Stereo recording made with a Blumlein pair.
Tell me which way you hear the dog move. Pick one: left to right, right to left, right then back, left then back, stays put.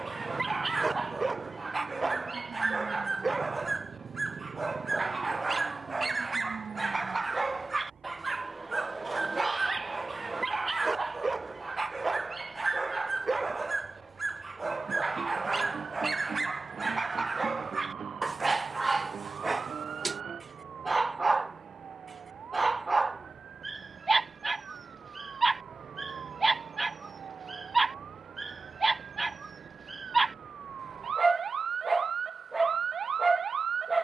stays put.